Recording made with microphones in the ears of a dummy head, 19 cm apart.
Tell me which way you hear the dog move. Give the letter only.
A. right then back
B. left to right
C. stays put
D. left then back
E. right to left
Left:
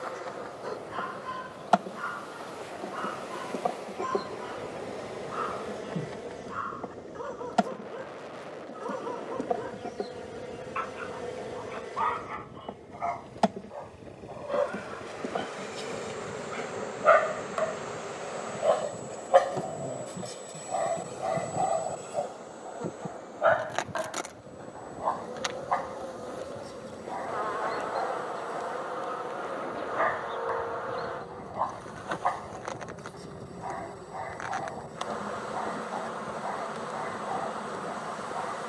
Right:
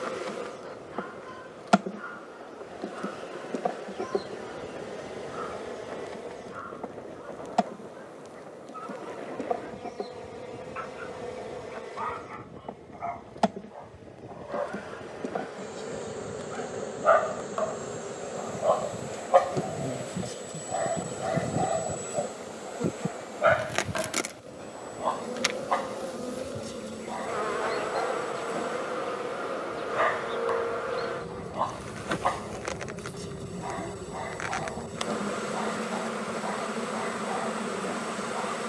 B.